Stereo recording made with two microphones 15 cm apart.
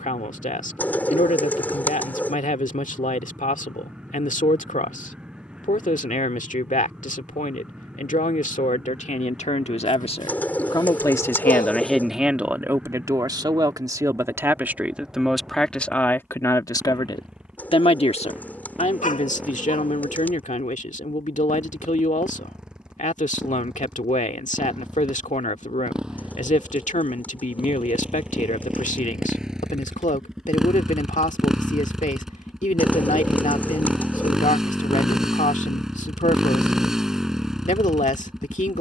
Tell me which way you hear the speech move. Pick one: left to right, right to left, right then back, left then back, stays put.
right then back.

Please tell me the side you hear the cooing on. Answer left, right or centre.
centre.